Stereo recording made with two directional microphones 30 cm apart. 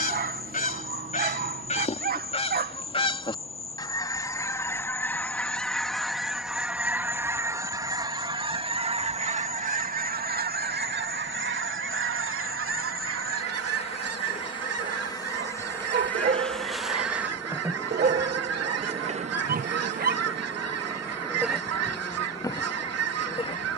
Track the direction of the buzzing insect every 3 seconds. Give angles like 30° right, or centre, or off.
20° left, 20° left, 20° left, 20° left, 20° left, centre, 20° right, 10° left.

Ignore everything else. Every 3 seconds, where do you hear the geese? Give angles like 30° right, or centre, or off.
20° left, 10° left, 10° right, 30° right, 50° right, 60° right, 60° right, 60° right.